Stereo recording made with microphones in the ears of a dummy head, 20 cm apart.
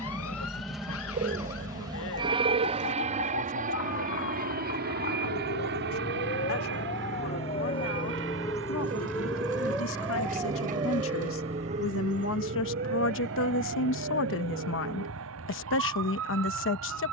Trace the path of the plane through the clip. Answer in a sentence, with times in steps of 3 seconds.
In this clip you hear the plane in the centre from 0 s and on the right from 3 s.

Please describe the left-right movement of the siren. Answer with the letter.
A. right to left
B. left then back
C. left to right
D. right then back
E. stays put
C.